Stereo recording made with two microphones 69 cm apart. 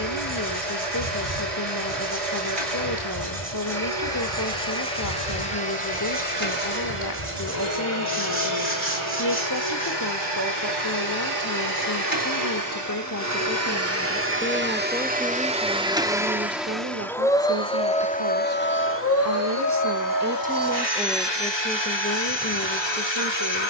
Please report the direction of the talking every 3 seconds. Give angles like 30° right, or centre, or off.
30° left, 30° left, 30° left, 30° left, 20° left, 10° right, 20° right, 20° left.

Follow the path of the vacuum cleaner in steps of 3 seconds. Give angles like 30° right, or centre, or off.
50° right, 50° right, 40° right, 40° right, 20° right, centre, 20° left, 40° left.